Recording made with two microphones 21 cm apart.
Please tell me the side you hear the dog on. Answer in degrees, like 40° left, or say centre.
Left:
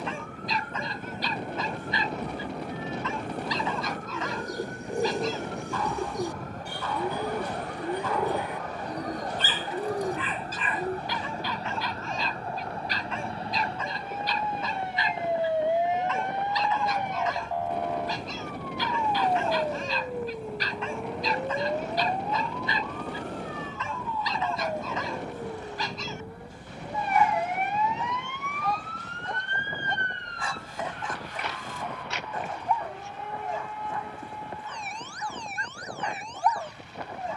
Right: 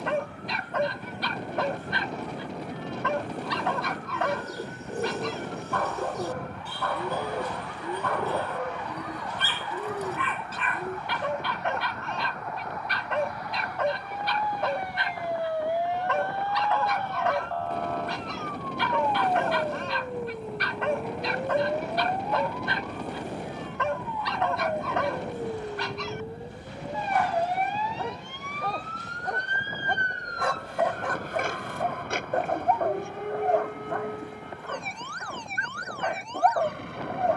60° right.